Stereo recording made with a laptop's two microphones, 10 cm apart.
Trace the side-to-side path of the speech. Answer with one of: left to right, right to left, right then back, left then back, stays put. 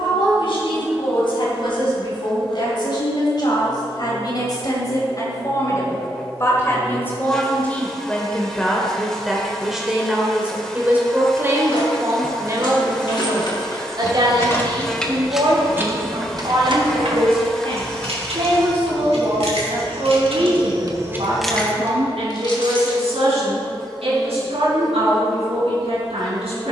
left to right.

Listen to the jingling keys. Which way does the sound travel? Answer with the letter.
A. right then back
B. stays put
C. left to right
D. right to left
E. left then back
A.